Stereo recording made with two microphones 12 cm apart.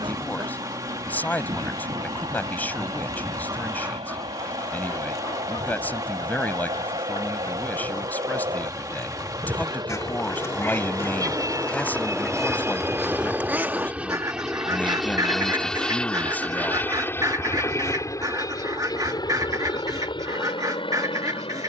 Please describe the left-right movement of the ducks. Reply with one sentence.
In this clip you hear the ducks go left and come back.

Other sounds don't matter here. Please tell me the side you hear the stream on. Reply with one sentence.
In this clip you hear the stream on the right.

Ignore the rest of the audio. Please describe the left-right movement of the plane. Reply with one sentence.
You can hear the plane travel towards the left.